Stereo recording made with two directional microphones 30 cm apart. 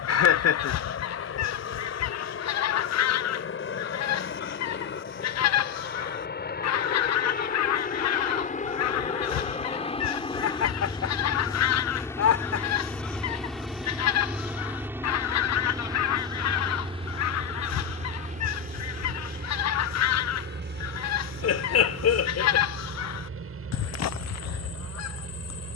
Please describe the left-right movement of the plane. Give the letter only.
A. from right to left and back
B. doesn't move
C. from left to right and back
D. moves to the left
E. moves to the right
E.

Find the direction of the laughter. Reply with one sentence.
In this clip you hear the laughter on the left.